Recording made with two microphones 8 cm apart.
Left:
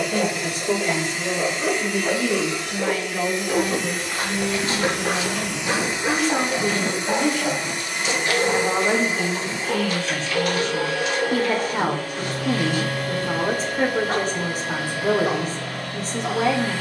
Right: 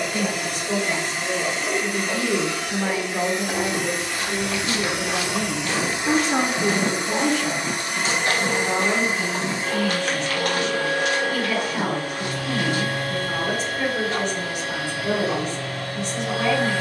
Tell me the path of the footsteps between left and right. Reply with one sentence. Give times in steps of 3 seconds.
In this clip you hear the footsteps not at all from 0 s, on the left from 3 s, on the right from 6 s and not at all from 15 s.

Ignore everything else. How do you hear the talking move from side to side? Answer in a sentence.
You can hear the talking move from left to right and back again.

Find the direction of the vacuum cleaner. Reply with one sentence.
In this clip you hear the vacuum cleaner on the right.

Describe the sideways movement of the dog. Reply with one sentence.
In this clip you hear the dog stay in one place.